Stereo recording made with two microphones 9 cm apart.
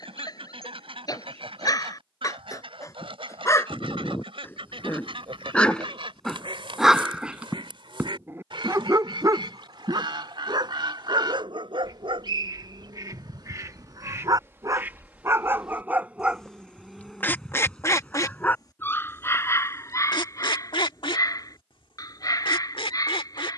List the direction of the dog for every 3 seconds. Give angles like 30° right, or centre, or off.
40° left, 20° left, 20° right, 50° right, 50° right, 10° right, 30° left, 40° left.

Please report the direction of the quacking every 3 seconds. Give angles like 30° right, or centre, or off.
70° right, 70° right, 60° right, 60° right, 40° right, 10° left, 50° left, 70° left.